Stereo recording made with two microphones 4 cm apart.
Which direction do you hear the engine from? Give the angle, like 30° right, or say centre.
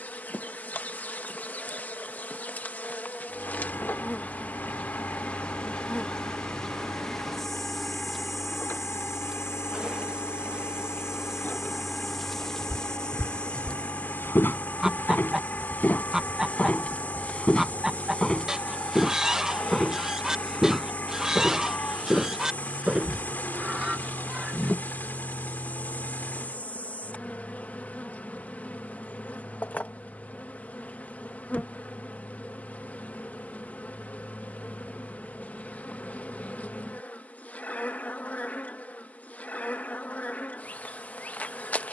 50° left.